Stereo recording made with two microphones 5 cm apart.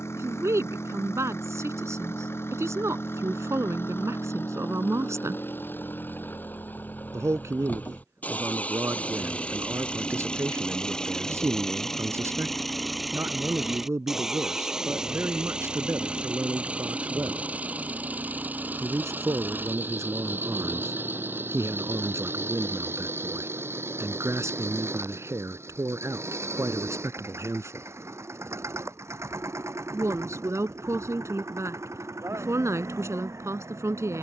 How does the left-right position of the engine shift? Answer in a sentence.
You can hear the engine travel towards the right.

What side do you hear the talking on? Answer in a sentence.
You can hear the talking on the right.